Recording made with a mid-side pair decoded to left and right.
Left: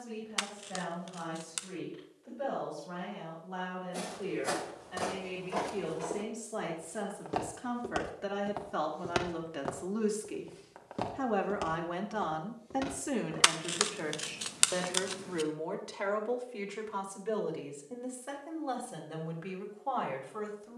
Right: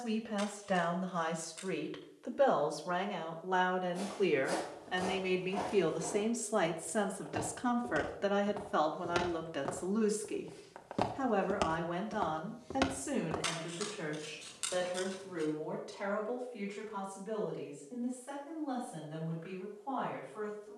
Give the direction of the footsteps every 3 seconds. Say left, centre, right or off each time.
off, left, left, centre, right, off, off.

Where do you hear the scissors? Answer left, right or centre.
left.